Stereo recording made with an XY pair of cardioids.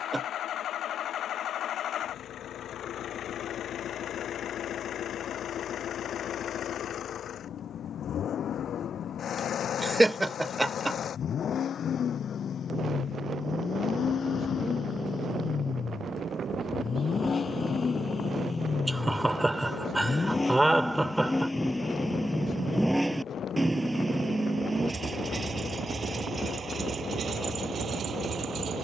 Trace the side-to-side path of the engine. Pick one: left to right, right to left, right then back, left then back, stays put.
left to right.